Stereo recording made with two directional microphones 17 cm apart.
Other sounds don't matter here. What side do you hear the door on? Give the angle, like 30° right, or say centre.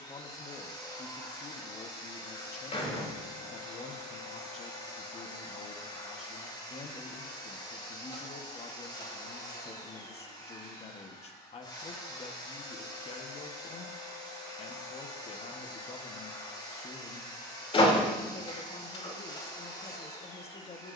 30° left.